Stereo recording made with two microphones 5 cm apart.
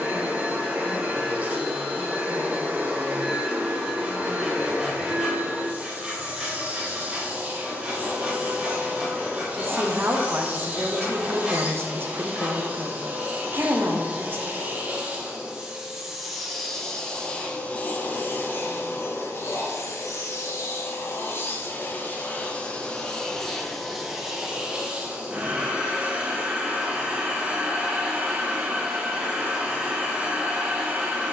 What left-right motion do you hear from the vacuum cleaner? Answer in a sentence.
You can hear the vacuum cleaner go left and come back.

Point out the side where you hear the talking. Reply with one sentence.
You can hear the talking on the right.